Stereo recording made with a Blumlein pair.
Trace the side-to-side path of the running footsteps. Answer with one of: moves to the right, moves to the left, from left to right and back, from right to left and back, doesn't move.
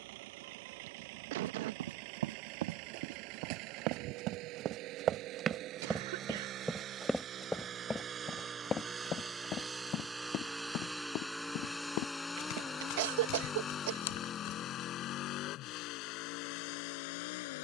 moves to the left.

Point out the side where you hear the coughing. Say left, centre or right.
right.